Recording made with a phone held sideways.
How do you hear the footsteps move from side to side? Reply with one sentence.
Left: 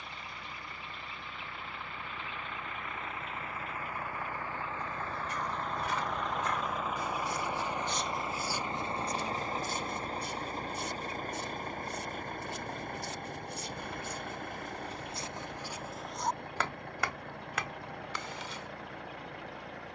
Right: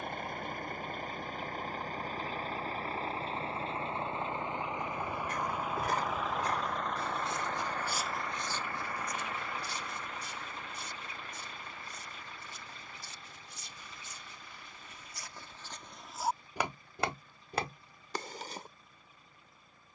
In this clip you hear the footsteps move from right to left and back again.